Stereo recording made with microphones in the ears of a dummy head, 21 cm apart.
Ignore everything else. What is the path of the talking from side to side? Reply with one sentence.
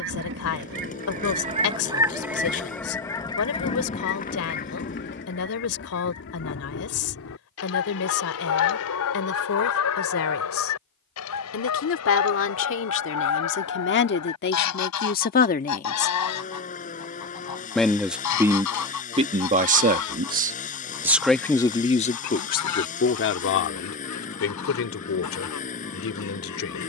In this clip you hear the talking go right and come back.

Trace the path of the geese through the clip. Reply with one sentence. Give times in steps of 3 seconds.
You can hear the geese on the right from 0 s and on the left from 3 s.